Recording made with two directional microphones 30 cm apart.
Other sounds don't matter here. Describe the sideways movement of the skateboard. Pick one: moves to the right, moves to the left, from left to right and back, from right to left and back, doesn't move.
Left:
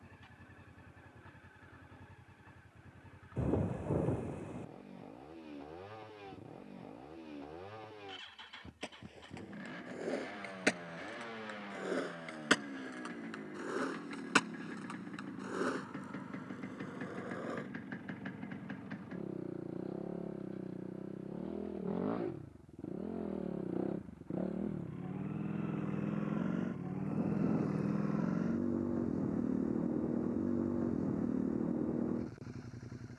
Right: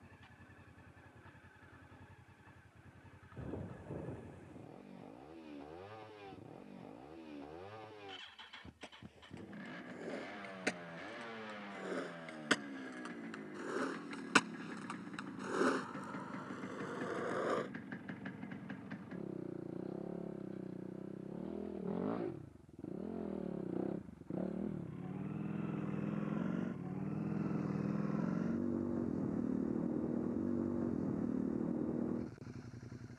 moves to the right.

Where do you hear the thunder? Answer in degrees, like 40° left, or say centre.
70° left.